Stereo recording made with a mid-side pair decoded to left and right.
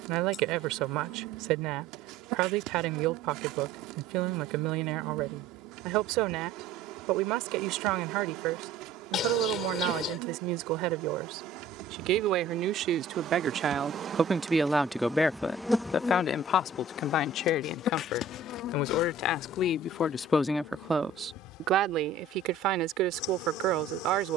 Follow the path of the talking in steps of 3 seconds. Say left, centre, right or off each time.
right, right, right, right, right, left, left, right.